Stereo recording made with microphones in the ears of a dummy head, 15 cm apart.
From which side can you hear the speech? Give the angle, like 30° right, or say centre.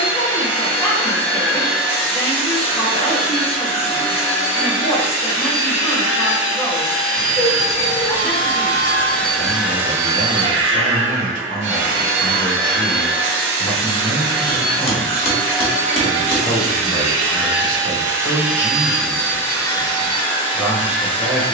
30° left.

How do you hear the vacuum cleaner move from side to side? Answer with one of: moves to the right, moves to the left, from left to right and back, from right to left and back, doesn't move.
from left to right and back.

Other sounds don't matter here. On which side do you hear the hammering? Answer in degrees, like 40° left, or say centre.
40° left.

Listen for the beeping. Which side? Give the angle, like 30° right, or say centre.
20° left.